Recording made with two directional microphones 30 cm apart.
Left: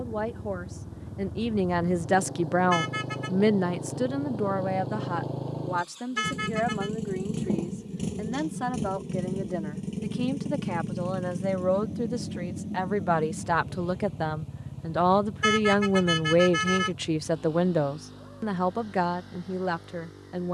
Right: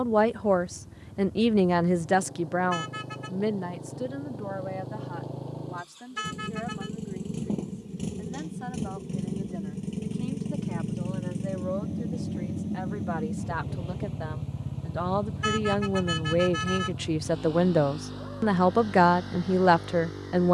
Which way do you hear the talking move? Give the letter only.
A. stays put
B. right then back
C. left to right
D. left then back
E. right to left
D.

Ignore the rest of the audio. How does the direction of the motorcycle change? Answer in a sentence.
You can hear the motorcycle go from the left side to the right.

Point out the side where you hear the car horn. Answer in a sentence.
In this clip you hear the car horn on the left.